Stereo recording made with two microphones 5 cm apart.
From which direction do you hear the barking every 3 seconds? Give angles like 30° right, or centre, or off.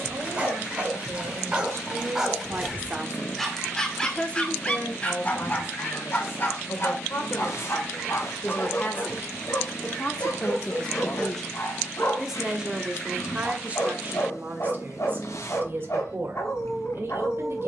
20° right, 20° left, 60° left, 70° left, 80° left, 80° left.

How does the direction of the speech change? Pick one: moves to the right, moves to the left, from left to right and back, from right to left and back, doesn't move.
from right to left and back.